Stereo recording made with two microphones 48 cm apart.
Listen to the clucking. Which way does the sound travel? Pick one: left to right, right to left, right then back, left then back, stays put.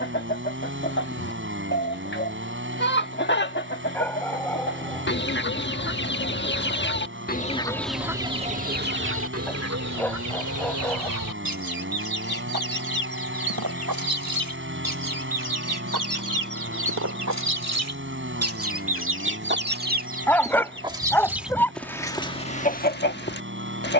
right then back.